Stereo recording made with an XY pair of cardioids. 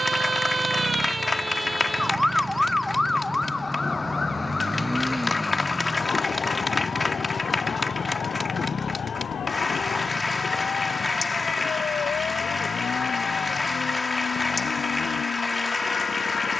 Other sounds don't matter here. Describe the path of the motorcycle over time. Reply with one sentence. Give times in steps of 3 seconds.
You can hear the motorcycle on the right from 0 s, in the centre from 3 s and on the left from 6 s.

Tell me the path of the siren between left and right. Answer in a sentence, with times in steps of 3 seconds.
You can hear the siren in the centre from 0 s and on the left from 3 s.